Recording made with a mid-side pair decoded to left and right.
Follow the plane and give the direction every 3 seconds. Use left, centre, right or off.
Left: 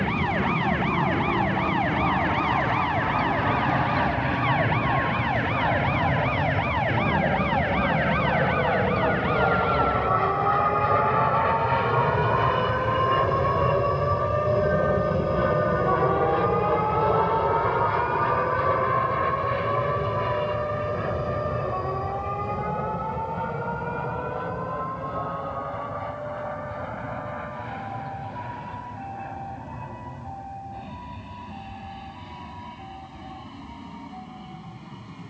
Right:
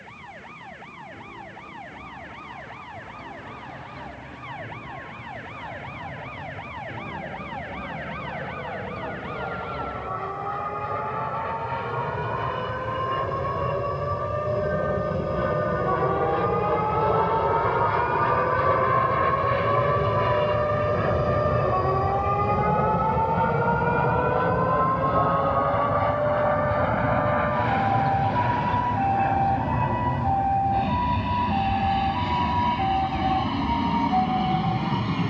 left, left, left, left, left, centre, centre, right, right, right, right, right.